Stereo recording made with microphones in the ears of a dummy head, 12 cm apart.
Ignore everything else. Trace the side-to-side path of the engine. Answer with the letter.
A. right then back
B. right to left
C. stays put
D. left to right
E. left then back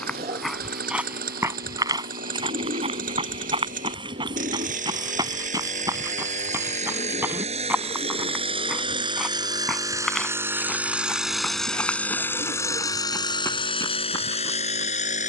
B.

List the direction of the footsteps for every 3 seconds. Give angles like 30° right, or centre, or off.
20° right, 30° right, 10° right, centre, 20° left.